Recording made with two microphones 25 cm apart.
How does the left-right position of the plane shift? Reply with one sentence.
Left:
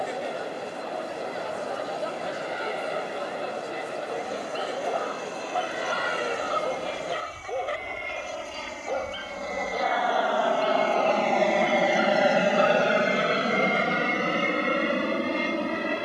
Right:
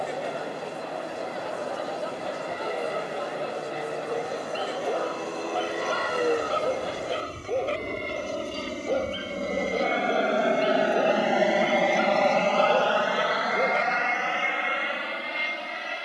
In this clip you hear the plane move from right to left.